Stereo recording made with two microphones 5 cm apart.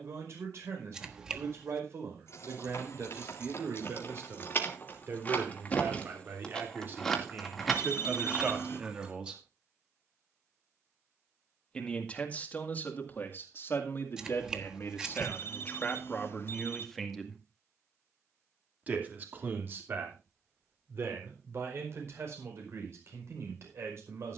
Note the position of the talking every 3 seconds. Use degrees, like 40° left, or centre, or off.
60° right, 50° right, 30° right, centre, 40° left, 20° left, 40° right, 50° right.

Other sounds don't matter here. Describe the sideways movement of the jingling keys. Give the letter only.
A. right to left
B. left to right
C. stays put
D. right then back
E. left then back
B.